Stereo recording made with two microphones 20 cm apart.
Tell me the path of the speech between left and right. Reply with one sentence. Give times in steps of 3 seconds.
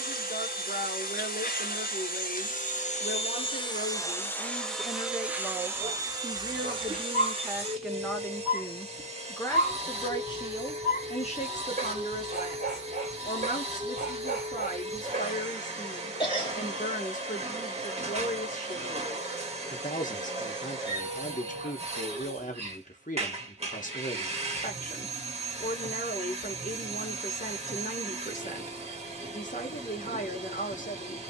In this clip you hear the speech on the left from 0 s, in the centre from 6 s and on the left from 9 s.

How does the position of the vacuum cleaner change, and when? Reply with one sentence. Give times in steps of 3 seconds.
You can hear the vacuum cleaner on the left from 0 s, in the centre from 3 s and on the right from 6 s.